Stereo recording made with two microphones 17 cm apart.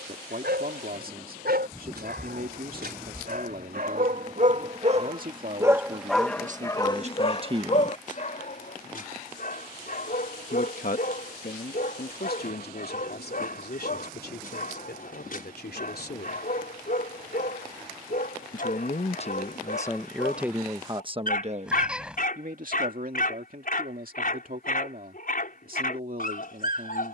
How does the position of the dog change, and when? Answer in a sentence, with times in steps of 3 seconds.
You can hear the dog on the right from 0 s and on the left from 6 s.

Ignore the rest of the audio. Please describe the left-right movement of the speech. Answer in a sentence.
In this clip you hear the speech go left and come back.